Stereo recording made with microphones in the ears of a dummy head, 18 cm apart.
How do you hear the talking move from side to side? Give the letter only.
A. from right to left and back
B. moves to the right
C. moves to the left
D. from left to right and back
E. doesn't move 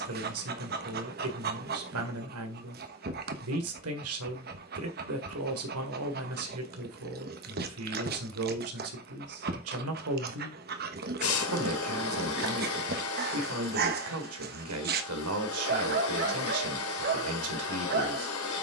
E.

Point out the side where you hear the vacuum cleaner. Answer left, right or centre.
left.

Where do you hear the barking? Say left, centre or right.
right.